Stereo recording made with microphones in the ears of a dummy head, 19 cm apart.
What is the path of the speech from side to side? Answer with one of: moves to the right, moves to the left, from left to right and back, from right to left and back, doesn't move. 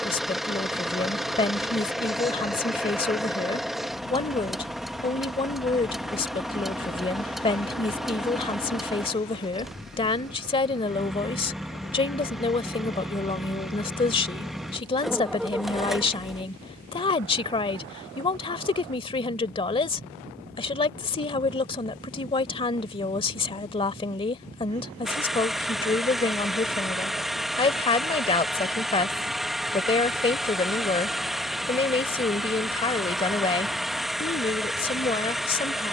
doesn't move.